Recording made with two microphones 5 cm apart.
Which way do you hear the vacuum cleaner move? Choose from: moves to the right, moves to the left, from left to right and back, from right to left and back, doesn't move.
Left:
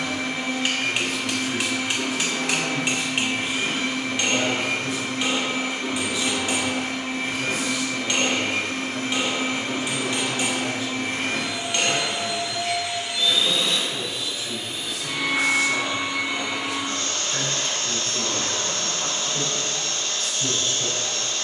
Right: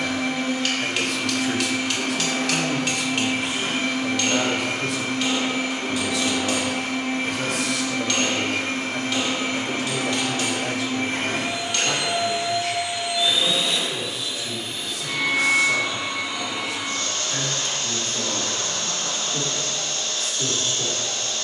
moves to the left.